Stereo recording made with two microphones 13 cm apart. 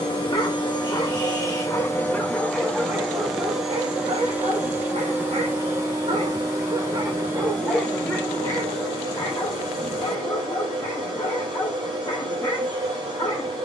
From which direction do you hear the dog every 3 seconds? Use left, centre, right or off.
left, right, centre, left, left.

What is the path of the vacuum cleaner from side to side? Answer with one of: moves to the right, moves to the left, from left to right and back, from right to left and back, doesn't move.
moves to the right.